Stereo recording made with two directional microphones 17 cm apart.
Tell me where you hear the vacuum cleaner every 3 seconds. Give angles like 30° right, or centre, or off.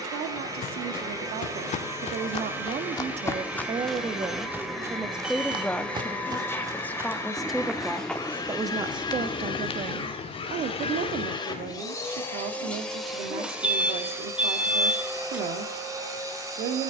20° right, centre, 20° left, 30° left, centre, 20° right.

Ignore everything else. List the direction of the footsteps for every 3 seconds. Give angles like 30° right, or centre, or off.
50° left, 10° right, centre, 40° left, off, off.